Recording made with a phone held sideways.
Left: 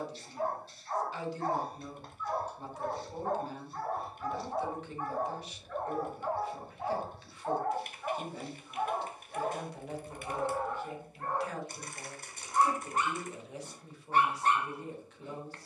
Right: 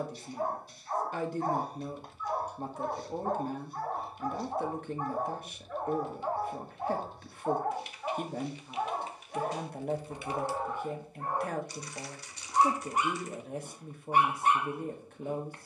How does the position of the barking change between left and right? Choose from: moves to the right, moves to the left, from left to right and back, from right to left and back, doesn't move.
doesn't move.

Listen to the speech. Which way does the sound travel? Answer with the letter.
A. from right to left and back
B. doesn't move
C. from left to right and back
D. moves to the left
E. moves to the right
B.